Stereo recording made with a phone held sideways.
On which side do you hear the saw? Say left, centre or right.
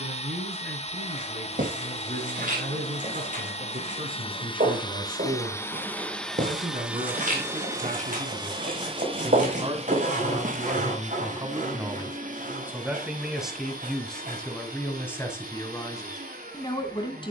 right.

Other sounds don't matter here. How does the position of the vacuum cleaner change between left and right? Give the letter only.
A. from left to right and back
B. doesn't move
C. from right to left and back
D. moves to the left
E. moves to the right
E.